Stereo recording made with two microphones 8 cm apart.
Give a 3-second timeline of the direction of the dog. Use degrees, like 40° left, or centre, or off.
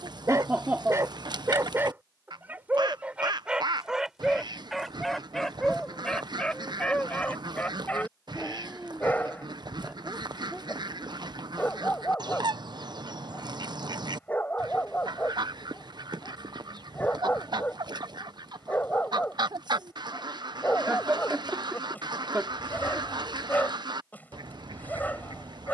30° right, centre, 20° left, 20° left, 20° left, 20° left, 20° left, 20° left, 20° left.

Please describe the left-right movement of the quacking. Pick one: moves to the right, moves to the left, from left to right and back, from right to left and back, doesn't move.
doesn't move.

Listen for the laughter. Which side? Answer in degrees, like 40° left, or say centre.
20° right.